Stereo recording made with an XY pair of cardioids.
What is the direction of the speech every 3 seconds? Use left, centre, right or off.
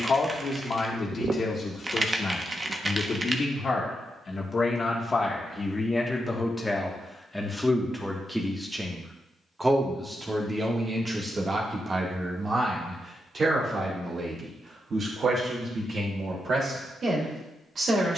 left, left, centre, right, right, right.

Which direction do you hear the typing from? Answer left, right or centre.
right.